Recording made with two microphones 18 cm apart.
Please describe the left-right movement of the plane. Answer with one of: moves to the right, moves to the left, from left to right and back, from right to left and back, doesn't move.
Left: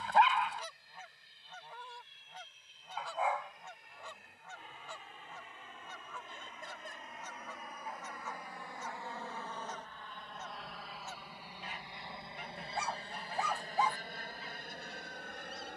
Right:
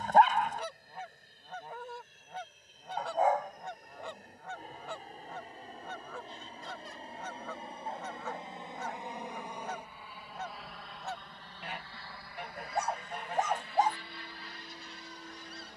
moves to the left.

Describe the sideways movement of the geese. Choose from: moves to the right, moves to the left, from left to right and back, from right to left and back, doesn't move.
doesn't move.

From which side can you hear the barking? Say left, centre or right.
right.